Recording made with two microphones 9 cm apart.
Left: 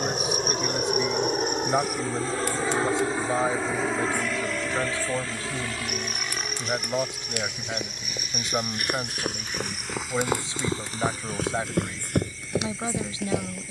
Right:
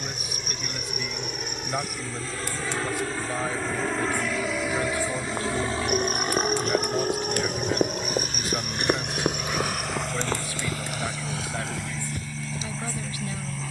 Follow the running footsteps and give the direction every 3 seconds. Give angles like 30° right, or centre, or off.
off, 50° right, 40° right, 20° left, 70° left.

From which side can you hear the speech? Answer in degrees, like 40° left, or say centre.
20° left.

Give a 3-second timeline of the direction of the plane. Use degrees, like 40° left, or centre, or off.
40° left, 10° right, 50° right, 70° right, 70° right.